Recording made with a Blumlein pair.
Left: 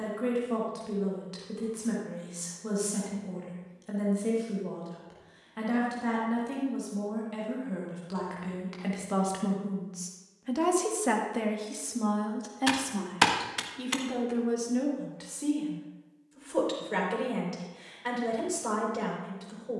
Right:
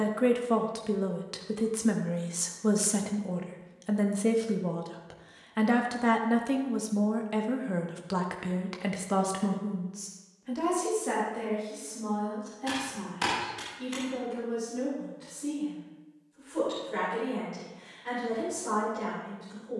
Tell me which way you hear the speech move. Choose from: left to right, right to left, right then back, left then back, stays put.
right to left.